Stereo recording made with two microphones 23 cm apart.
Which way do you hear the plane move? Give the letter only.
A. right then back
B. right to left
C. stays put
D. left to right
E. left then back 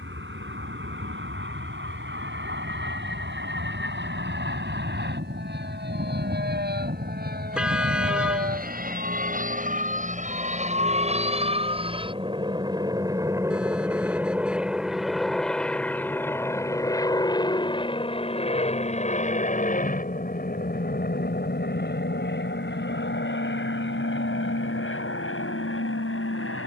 B.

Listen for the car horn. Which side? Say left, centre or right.
centre.